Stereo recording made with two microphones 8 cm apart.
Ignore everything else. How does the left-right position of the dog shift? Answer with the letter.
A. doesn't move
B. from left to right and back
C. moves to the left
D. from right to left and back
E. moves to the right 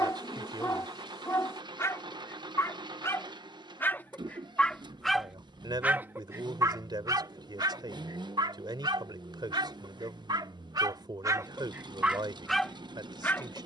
B.